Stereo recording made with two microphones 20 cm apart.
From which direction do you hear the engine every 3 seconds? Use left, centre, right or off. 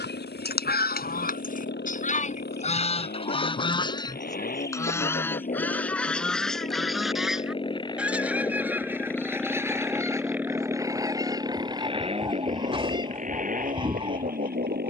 left, left, left, centre, right.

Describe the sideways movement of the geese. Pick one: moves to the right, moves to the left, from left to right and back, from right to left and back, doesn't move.
moves to the right.